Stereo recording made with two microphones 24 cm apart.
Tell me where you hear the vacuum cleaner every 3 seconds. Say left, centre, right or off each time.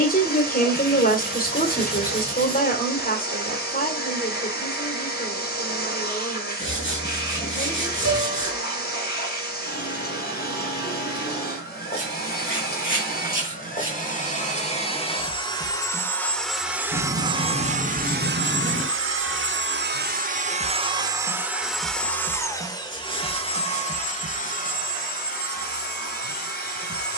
left, left, left, left, left, centre, right, centre, left.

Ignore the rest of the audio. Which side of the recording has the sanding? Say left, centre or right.
left.